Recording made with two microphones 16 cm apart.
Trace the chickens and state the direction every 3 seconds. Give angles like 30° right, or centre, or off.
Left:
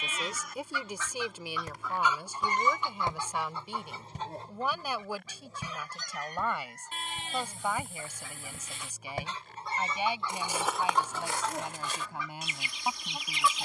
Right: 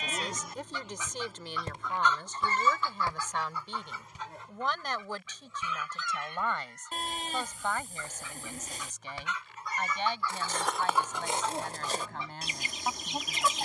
centre, 30° left, 40° left, 20° left, 40° right.